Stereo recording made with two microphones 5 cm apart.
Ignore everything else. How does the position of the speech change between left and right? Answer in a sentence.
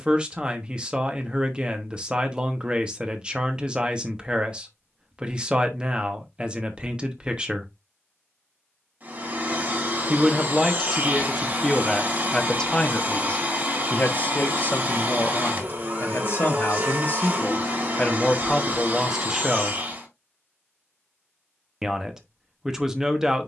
In this clip you hear the speech move from right to left and back again.